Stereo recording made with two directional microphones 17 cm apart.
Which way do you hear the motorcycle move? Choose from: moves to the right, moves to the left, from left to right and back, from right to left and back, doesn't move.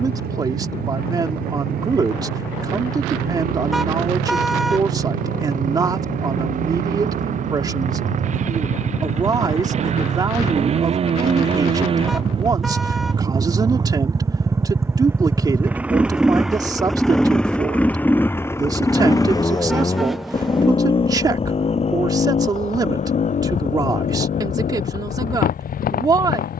moves to the left.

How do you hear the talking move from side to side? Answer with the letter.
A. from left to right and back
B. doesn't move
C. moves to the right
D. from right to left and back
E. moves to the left
B.